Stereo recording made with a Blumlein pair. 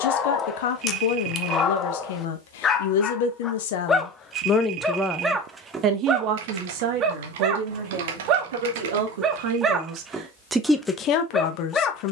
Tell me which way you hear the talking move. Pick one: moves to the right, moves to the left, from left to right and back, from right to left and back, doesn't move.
from left to right and back.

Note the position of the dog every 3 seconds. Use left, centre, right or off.
left, centre, right, centre.